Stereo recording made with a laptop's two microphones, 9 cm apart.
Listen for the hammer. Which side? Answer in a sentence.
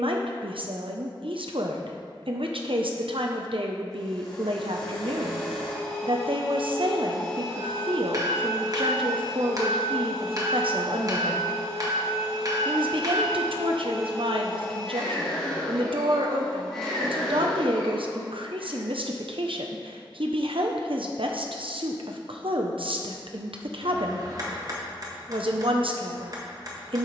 You can hear the hammer on the right.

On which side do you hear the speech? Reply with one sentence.
You can hear the speech on the right.